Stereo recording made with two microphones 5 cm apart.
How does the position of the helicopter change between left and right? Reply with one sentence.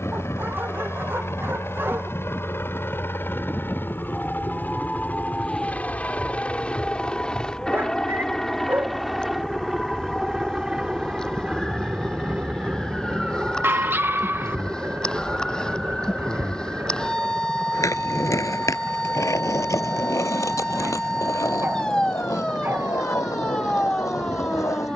In this clip you hear the helicopter travel towards the right.